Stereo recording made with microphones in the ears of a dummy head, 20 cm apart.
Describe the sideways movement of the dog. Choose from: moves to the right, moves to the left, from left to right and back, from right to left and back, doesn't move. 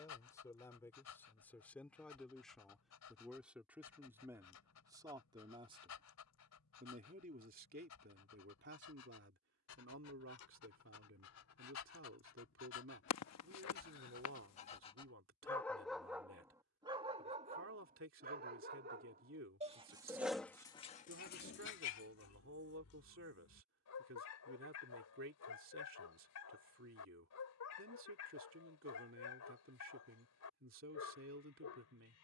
from left to right and back.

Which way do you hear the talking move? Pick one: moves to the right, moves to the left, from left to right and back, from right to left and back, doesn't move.
moves to the right.